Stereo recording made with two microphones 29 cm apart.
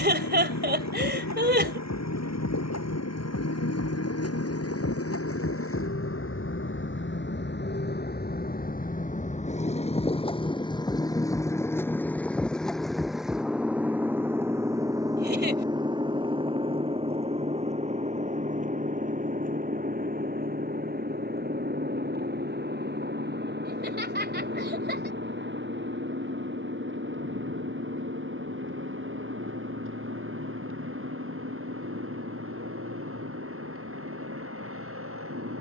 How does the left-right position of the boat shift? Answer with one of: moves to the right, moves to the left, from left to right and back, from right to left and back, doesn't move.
moves to the right.